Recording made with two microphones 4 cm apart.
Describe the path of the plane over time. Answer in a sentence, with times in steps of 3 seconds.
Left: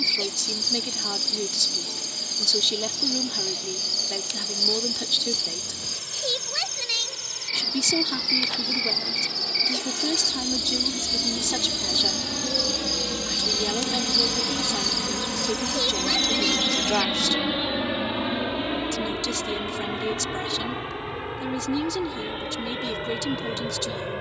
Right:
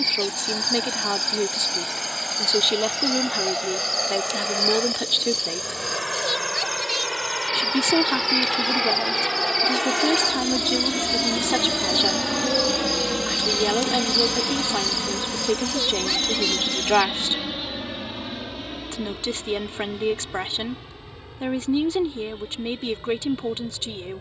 You can hear the plane on the right from 0 s, in the centre from 15 s and on the left from 18 s.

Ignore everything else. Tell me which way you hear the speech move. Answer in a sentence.
In this clip you hear the speech stay put.